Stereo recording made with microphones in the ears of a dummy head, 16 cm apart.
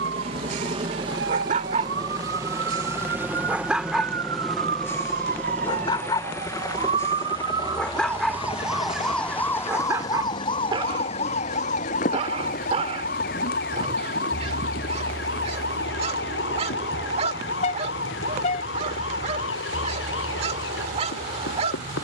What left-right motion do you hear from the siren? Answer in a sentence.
In this clip you hear the siren move from right to left.